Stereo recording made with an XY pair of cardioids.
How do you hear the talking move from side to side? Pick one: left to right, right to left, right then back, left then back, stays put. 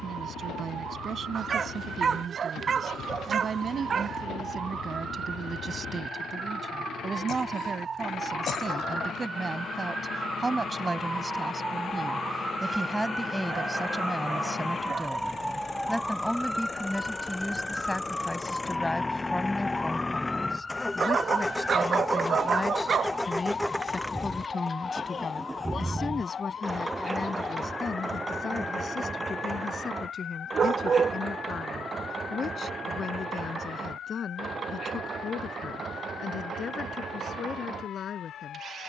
right to left.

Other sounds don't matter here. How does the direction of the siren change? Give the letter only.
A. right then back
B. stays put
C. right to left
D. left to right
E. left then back
C.